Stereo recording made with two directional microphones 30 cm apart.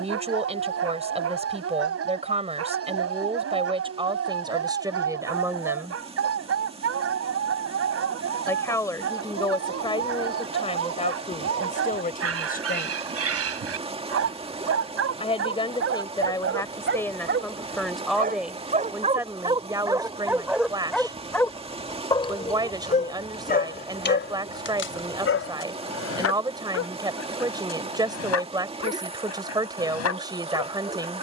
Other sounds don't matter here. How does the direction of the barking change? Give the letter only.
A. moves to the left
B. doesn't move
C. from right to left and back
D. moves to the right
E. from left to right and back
A.